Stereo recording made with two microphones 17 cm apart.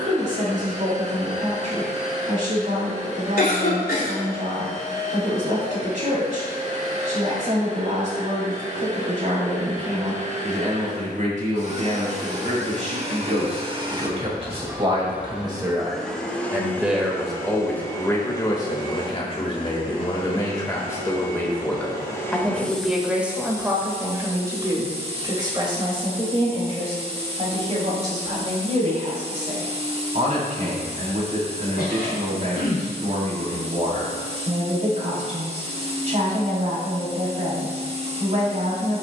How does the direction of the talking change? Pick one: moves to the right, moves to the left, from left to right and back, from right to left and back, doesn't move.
from right to left and back.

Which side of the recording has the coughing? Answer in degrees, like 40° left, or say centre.
70° left.